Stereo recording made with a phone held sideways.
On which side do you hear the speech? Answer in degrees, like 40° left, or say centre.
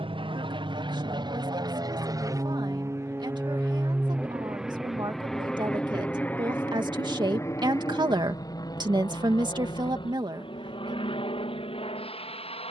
30° right.